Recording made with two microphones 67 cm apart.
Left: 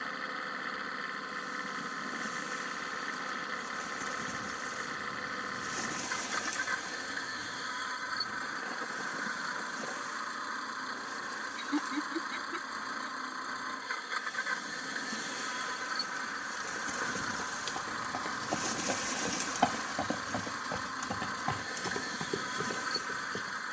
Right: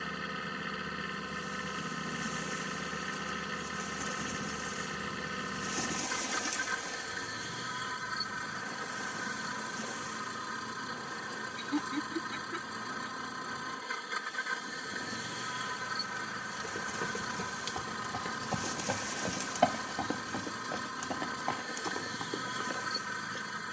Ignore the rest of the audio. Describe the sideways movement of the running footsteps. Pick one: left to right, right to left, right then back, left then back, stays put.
right to left.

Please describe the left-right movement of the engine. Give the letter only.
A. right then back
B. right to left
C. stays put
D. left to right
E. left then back
C.